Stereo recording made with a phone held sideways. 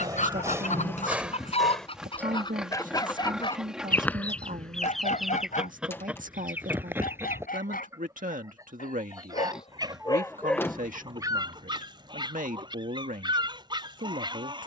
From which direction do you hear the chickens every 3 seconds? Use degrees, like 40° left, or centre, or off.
40° left, centre, 20° right, 30° right, 30° right.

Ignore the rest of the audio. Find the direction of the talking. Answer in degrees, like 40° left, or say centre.
70° right.